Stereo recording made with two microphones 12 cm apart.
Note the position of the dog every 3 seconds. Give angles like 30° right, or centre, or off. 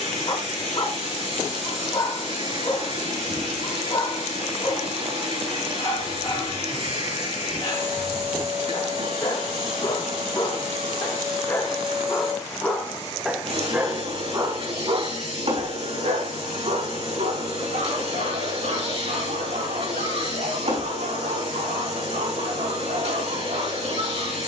40° left, 40° left, 40° left, 30° left, 10° right, 60° right, 80° right, 80° right.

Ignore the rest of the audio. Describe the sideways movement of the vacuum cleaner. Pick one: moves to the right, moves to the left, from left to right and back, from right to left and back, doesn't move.
doesn't move.